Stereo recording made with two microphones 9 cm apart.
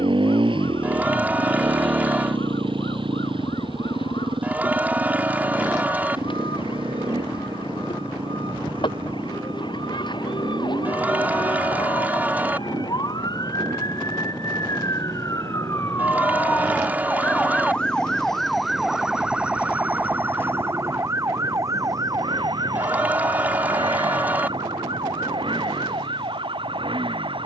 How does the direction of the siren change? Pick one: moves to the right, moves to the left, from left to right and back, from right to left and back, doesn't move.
moves to the right.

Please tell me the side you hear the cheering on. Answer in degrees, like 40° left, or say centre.
20° right.